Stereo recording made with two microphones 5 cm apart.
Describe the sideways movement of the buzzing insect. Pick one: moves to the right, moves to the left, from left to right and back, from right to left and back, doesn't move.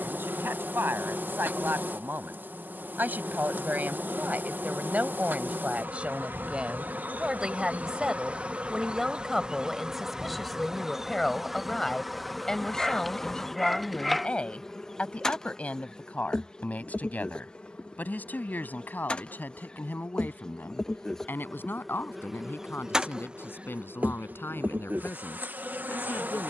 from right to left and back.